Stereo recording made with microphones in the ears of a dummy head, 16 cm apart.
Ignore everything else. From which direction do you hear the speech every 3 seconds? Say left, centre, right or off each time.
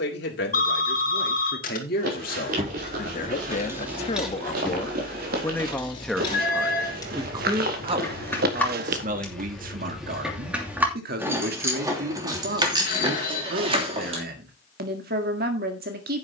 left, left, right, right, right, right.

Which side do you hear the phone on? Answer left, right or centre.
left.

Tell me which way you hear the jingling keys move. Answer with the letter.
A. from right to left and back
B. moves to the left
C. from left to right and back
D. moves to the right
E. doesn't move
A.